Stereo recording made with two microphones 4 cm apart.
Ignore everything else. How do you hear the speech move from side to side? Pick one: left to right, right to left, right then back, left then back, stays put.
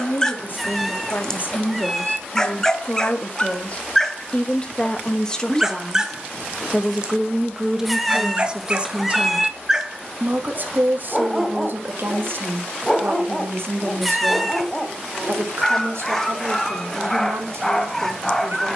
left to right.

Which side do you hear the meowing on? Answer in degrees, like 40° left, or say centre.
centre.